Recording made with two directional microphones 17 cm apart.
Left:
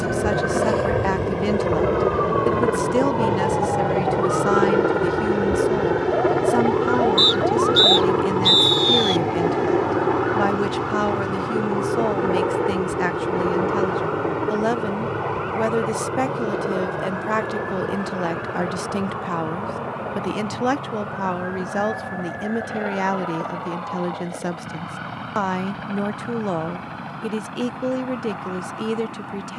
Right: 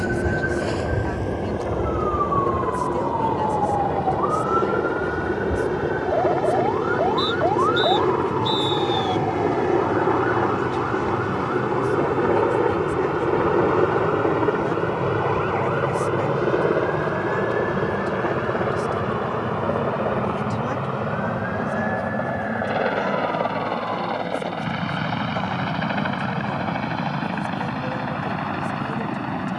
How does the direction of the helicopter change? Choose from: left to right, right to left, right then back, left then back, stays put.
left to right.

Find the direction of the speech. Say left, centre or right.
left.